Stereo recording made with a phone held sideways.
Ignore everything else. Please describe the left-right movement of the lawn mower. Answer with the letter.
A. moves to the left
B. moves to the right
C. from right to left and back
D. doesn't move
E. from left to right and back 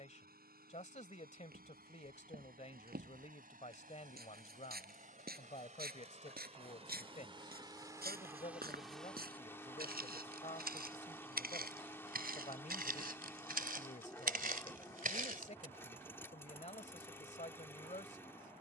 A.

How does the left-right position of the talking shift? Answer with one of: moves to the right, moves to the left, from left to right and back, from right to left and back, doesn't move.
doesn't move.